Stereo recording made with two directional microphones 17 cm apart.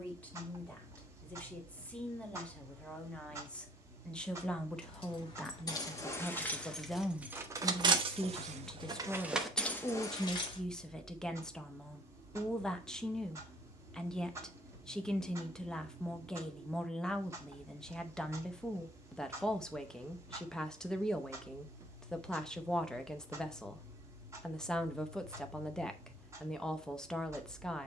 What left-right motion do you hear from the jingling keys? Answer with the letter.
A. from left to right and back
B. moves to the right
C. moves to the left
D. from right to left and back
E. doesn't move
A.